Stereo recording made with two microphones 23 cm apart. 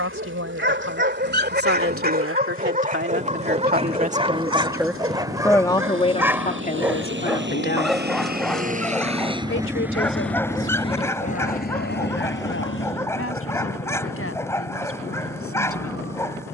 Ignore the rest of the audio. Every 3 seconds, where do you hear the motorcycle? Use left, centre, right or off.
right, right, right, centre, left, left.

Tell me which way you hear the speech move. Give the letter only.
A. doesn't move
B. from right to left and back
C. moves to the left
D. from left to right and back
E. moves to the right
C.